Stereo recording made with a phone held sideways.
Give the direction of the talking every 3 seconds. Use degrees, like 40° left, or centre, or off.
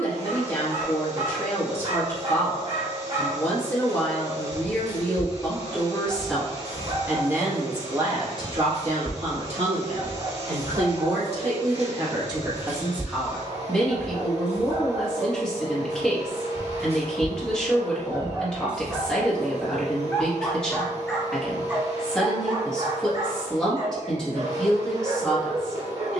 20° left, 20° left, 20° right, 50° right, 10° right, 10° left, 10° left, 10° left, 10° left.